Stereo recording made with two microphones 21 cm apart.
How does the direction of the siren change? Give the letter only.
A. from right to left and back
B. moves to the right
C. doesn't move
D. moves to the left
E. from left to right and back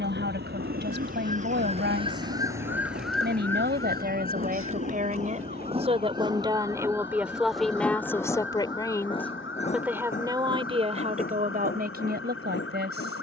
D.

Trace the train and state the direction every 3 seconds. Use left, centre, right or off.
right, right, centre, left, left.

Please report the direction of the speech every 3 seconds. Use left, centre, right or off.
right, right, centre, right, right.